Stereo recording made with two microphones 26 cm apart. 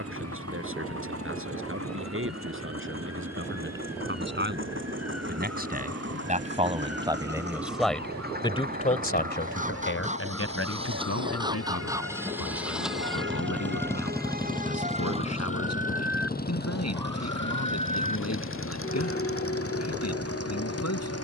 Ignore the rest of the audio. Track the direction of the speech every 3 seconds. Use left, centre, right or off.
right, right, centre, left, left, left, left.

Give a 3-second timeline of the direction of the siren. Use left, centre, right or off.
right, right, right, right, right, centre, left.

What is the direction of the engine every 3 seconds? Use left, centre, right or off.
right, right, right, right, centre, left, left.